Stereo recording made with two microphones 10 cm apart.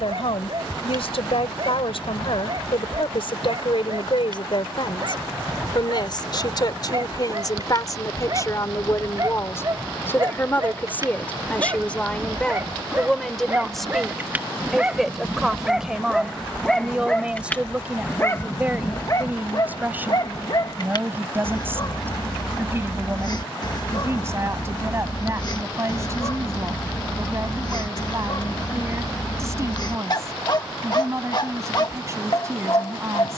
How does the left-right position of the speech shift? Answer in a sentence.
You can hear the speech go from the left side to the right.